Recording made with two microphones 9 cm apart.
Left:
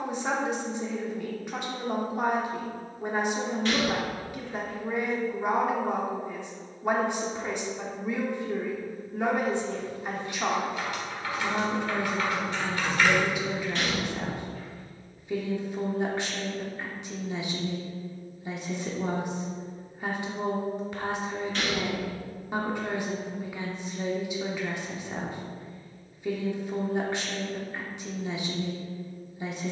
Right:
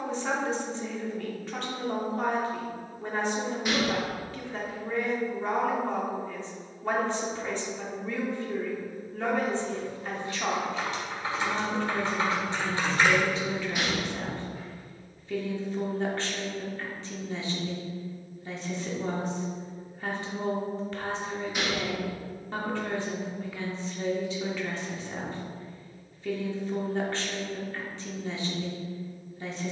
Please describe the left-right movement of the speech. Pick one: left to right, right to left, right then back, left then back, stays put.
stays put.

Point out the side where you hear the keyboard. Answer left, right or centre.
right.